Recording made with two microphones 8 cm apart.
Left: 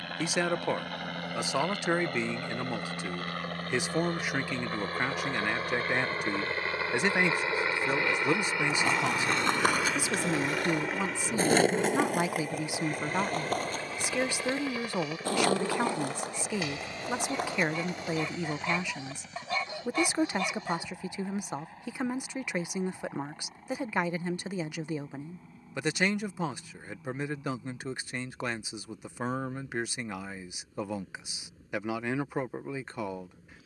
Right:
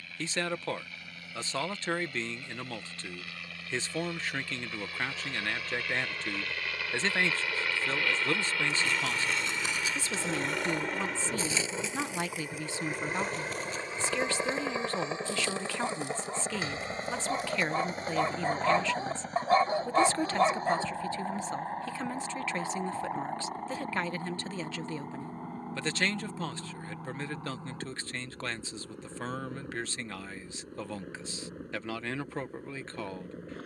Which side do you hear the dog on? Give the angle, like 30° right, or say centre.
40° right.